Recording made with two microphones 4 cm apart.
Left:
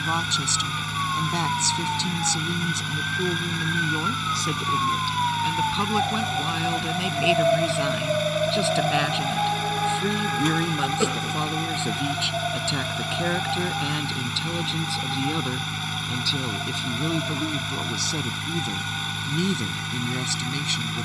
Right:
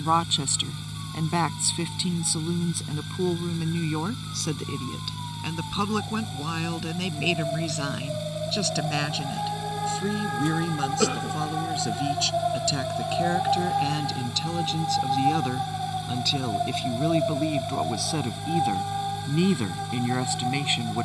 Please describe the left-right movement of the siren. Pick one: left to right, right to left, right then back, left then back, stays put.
left to right.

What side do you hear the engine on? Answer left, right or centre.
left.